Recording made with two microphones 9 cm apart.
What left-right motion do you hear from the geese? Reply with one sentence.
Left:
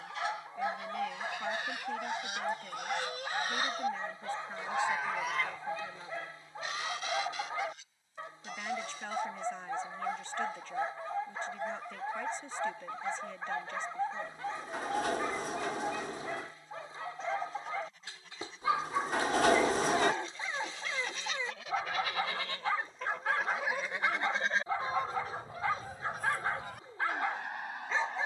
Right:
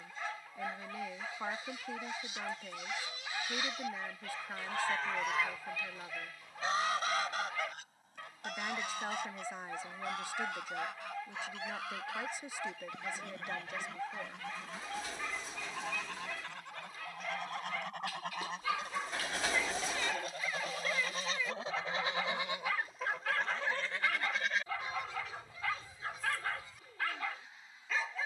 You can hear the geese move from left to right and back again.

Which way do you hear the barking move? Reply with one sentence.
You can hear the barking stay in one place.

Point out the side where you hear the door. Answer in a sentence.
In this clip you hear the door on the left.